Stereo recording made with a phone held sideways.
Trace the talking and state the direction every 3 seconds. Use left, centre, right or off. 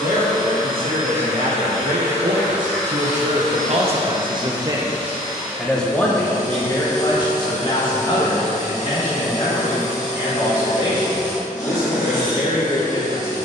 right, right, left, left, left.